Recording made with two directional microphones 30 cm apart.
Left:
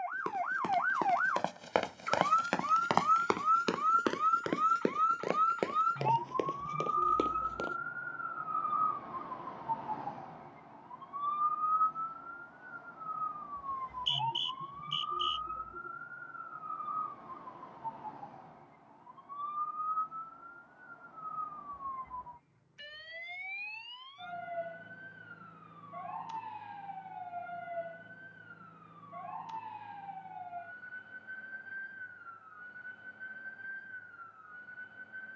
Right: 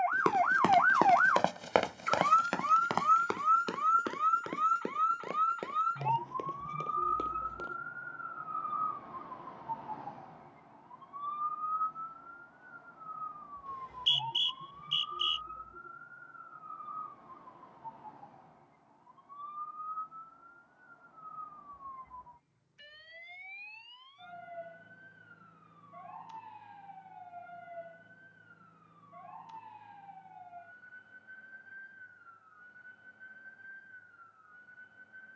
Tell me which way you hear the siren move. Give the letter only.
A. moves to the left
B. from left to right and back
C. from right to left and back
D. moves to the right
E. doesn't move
A.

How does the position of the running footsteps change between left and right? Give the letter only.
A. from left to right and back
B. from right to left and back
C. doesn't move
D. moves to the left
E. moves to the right
D.